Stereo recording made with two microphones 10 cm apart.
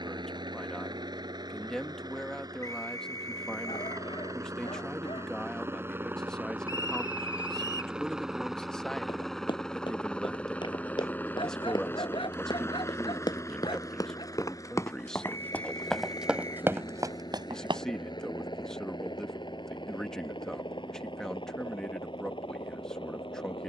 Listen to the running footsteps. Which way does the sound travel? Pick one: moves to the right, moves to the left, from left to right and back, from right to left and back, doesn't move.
moves to the right.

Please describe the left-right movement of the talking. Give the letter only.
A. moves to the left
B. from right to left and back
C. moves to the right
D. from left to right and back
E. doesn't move
E.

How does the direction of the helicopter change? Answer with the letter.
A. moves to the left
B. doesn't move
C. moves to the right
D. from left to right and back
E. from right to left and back
A.